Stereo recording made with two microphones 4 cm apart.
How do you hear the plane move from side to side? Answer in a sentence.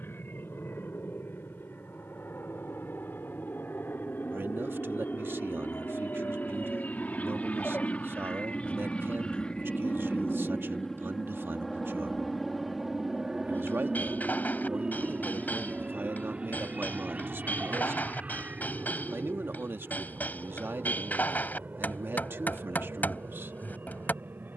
You can hear the plane travel towards the right.